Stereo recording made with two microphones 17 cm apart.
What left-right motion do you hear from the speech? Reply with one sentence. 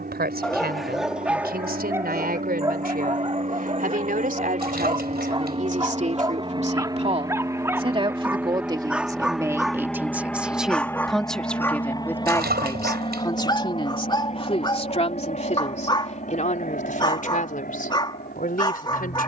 In this clip you hear the speech move from right to left.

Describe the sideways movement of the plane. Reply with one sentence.
You can hear the plane move to the left.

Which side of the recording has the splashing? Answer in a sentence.
You can hear the splashing on the right.